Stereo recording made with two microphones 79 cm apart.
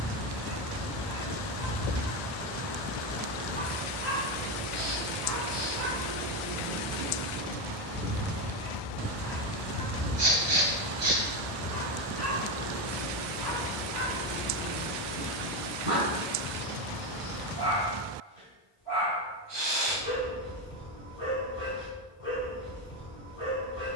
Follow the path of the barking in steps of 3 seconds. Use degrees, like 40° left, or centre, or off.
60° right, 50° right, 20° right, 10° left, 30° left, 40° left, 40° left, 40° left.